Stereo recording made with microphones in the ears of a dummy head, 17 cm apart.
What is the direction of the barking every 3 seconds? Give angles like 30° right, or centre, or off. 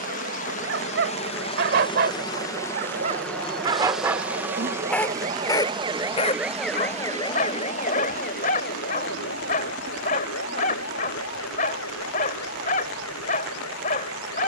60° right, centre, 40° left, 40° left, 40° left.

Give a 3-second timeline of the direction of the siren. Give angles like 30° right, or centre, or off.
70° right, 50° right, 20° left, 70° left, 80° left.